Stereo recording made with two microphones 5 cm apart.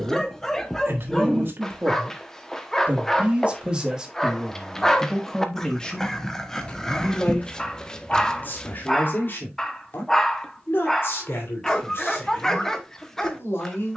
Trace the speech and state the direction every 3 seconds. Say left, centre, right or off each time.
right, centre, left, left, left.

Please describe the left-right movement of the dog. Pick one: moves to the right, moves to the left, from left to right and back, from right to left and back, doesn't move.
doesn't move.